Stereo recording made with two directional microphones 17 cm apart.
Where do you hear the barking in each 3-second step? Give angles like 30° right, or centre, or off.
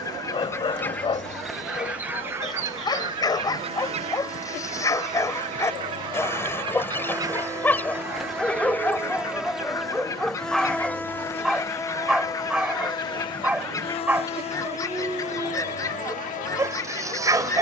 30° left, 20° left, 10° left, centre, 10° right, 20° right.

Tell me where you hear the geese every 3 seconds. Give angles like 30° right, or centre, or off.
centre, 40° right, 10° right, 20° left, 20° left, 20° left.